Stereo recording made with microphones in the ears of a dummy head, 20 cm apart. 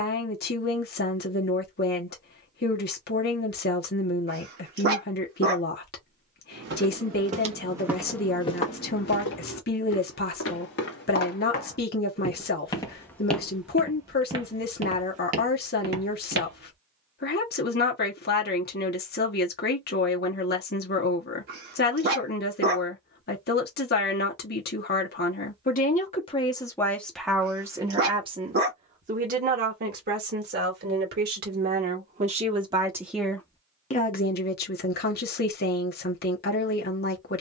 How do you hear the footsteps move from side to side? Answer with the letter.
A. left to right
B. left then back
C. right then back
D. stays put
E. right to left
B.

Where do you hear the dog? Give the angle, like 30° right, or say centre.
50° right.